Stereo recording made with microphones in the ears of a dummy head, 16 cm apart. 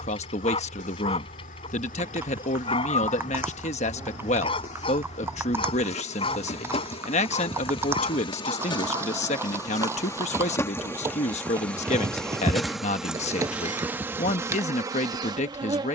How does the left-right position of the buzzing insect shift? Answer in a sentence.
You can hear the buzzing insect go from the left side to the right.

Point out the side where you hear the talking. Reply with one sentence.
In this clip you hear the talking on the left.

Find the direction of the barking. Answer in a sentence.
In this clip you hear the barking on the left.